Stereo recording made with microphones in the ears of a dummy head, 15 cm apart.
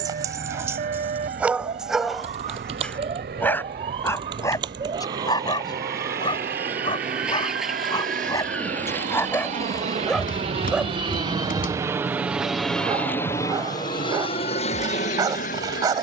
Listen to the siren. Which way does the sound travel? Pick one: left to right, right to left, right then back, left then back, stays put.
right to left.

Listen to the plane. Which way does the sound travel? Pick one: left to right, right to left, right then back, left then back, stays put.
right to left.